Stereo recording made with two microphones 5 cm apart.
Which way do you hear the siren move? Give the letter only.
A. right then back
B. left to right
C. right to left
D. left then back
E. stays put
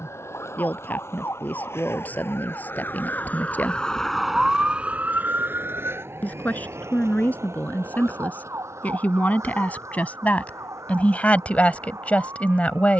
B.